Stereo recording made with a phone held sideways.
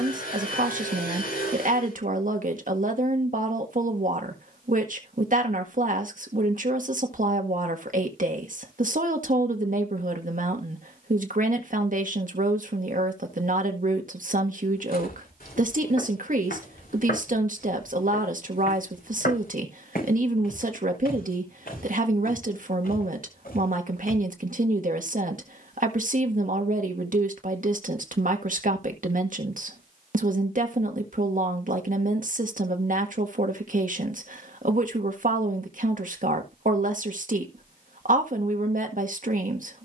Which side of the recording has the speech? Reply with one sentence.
In this clip you hear the speech on the right.